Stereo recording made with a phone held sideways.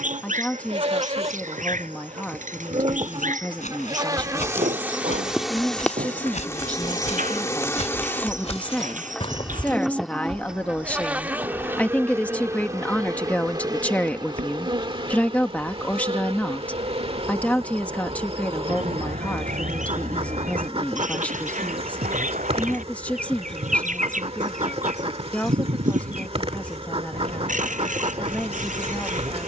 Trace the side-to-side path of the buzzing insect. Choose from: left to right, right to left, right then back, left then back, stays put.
left then back.